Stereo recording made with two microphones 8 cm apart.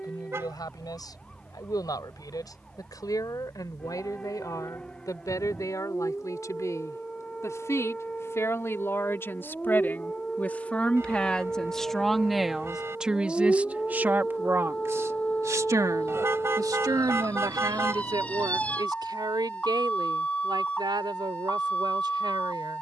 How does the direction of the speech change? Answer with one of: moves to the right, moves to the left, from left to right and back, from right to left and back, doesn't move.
moves to the right.